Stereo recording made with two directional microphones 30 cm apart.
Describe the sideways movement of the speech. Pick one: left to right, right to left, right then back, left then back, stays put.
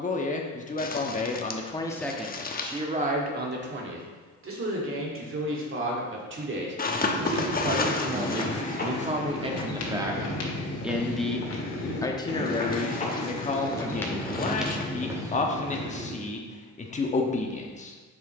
right then back.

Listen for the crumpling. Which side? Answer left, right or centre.
left.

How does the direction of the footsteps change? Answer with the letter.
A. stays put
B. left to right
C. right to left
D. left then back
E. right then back
D.